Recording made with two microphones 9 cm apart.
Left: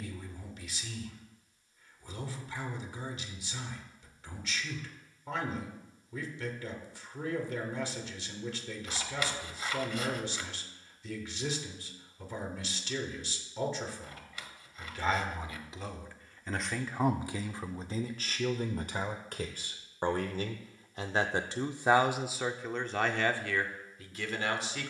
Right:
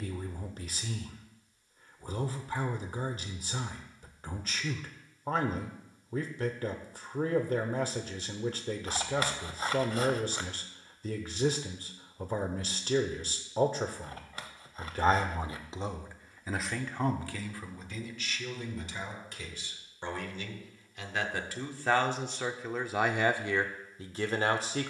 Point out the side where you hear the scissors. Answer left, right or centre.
right.